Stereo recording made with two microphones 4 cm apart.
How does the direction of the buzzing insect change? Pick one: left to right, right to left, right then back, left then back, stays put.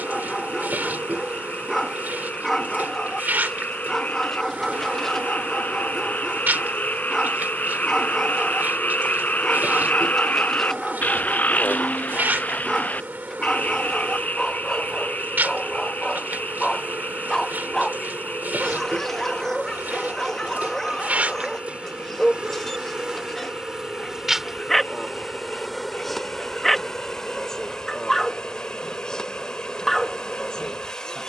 right to left.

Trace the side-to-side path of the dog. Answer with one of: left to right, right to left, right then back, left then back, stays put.
stays put.